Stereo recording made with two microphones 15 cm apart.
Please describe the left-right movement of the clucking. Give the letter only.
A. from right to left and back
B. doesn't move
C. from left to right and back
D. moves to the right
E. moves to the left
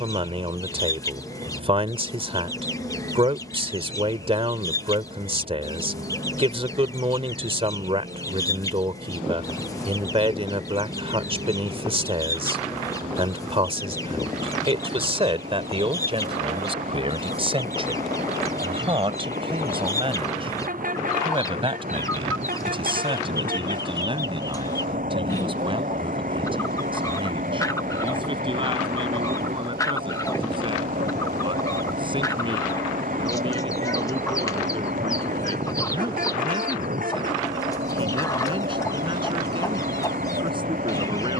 B.